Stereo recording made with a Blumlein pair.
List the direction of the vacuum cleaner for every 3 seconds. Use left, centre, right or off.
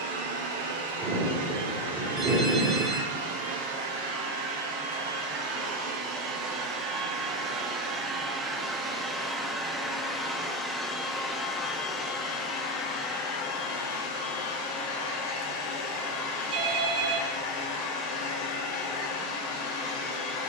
right, right, right, centre, left, left, left.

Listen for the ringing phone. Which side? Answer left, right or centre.
right.